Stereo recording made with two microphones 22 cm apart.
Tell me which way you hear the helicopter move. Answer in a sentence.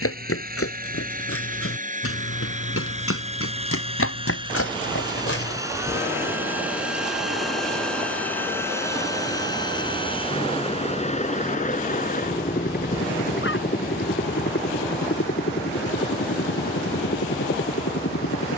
You can hear the helicopter move to the left.